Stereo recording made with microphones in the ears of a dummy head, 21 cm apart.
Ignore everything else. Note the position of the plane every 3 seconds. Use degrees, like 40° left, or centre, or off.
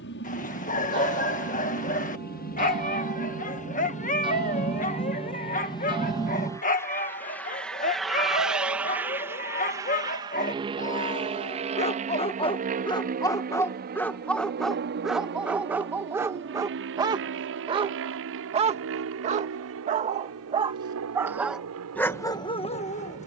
50° left, 30° left, 10° left, 20° right, 40° right, 50° right, 60° right, 60° right.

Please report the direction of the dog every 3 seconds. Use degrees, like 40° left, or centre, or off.
30° left, 30° left, 30° left, 30° left, 10° left, 10° right, 30° right, 10° left.